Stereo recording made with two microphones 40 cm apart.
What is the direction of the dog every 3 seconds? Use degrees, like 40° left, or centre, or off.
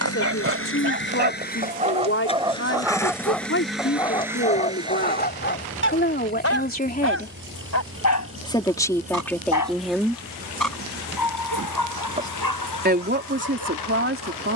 20° right, 20° left, 40° left, 60° left, 60° left.